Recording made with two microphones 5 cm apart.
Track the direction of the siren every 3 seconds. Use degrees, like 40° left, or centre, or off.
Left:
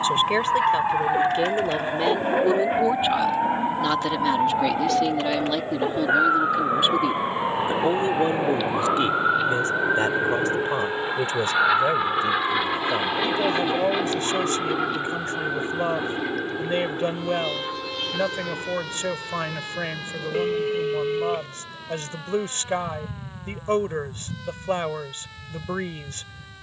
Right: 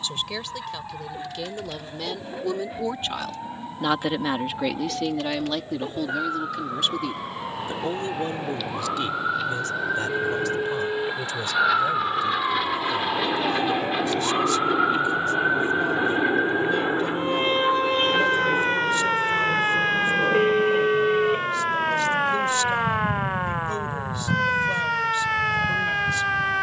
50° left, 40° left, 30° left, 10° left, 10° right, 30° right, 50° right, 60° right, 60° right.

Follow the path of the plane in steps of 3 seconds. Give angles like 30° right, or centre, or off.
60° left, 60° left, 40° left, 30° left, 10° left, 20° right, 40° right, 50° right, 60° right.